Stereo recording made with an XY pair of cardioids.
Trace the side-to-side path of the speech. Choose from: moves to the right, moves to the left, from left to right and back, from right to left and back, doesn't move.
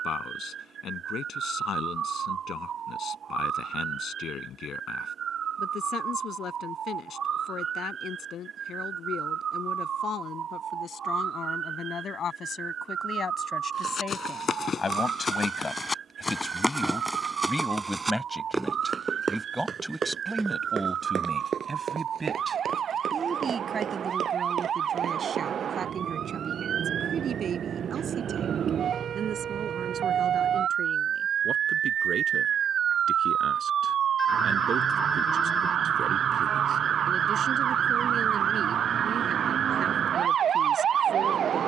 moves to the right.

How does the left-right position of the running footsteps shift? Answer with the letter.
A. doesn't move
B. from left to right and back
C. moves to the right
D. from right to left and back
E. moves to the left
C.